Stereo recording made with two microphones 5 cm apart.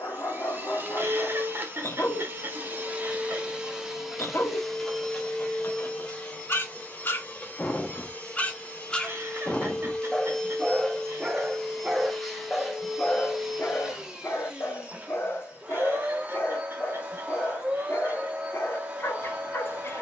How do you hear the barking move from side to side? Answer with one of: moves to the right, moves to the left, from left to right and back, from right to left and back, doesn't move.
from left to right and back.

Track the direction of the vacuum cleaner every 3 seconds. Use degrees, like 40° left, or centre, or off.
40° right, centre, 20° left, 10° left, 10° right, 30° right, 30° right.